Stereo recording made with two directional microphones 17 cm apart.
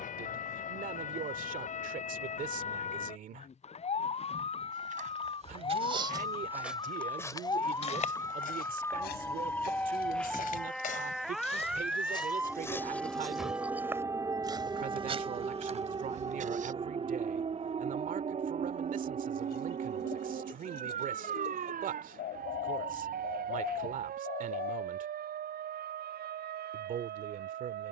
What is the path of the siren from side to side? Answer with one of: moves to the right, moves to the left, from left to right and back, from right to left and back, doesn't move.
moves to the right.